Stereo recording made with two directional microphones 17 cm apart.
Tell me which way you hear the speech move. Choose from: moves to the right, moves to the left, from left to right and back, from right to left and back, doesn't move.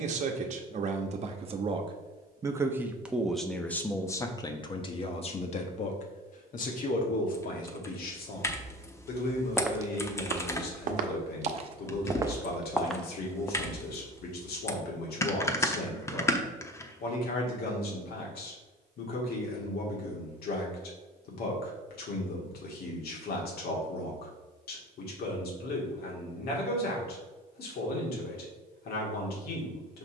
moves to the left.